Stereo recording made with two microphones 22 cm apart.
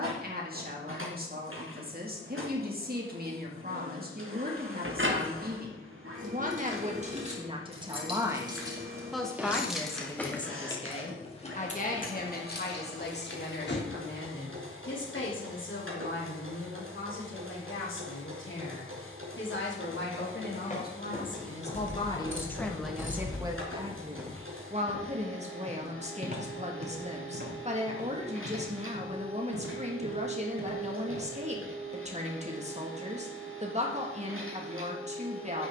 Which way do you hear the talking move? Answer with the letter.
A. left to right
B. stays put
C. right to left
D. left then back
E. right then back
D.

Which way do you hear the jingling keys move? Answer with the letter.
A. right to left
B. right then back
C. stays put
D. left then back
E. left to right
A.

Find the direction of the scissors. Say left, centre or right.
right.